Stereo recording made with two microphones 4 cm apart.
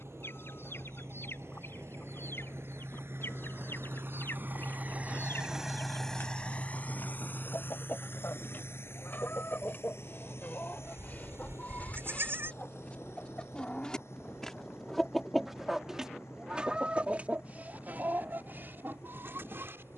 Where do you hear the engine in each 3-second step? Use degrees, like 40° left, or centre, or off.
80° right, 40° right, 50° left, 70° left, 80° left, 80° left, 80° left.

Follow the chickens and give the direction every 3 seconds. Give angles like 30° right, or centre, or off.
60° left, 60° left, 50° left, 40° left, 20° left, 20° right, 60° right.